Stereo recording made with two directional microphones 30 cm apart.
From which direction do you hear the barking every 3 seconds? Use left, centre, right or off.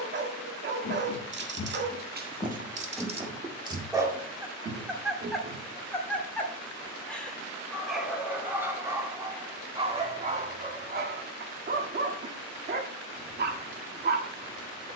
right, centre, centre, right, right.